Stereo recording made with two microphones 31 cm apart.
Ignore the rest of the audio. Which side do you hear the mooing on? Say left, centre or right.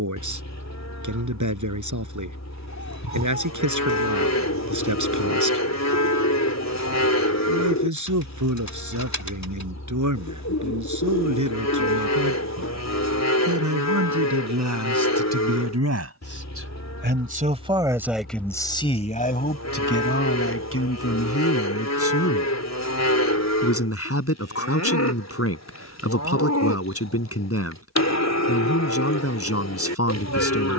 left.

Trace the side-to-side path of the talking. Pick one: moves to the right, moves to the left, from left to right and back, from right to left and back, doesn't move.
moves to the left.